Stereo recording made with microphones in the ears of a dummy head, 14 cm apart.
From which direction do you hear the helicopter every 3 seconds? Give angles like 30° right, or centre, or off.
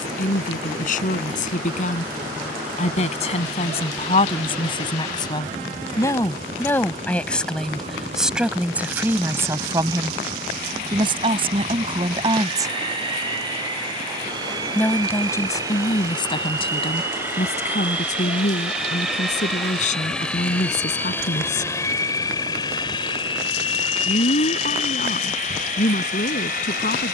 50° right, 50° right, 40° right, 40° right, 30° right, 20° right, centre, 20° left, 50° left.